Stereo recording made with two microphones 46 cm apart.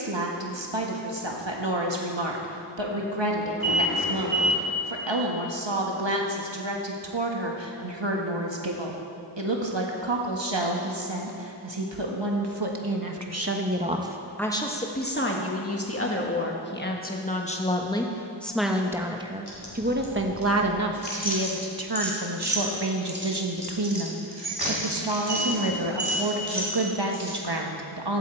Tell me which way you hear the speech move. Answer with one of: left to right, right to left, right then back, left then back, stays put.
left then back.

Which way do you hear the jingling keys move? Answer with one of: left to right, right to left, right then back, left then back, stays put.
left to right.